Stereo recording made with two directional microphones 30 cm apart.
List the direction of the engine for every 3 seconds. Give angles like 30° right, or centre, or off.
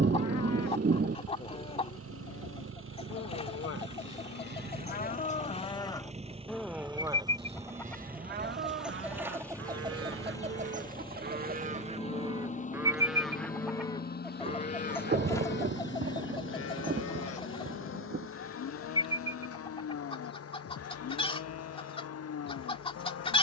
50° right, 30° right, 10° right, 10° left, 30° left, 40° left, 50° left, 50° left.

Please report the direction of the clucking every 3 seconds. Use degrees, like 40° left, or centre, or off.
20° left, 20° left, centre, 20° right, centre, 10° left, 20° left, 20° left.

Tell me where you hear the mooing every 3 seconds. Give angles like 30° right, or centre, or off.
60° left, 30° left, 20° right, 40° right, centre, 40° left, 50° left, 50° left.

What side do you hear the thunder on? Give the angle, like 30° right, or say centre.
30° right.